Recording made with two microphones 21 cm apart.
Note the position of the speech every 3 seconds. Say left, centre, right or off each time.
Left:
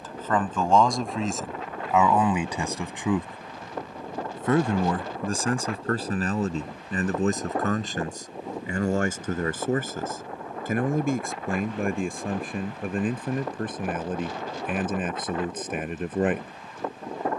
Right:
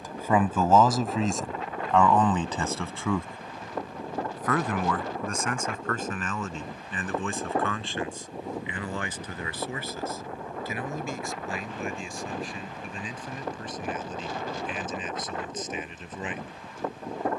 centre, left, left, left, left, left.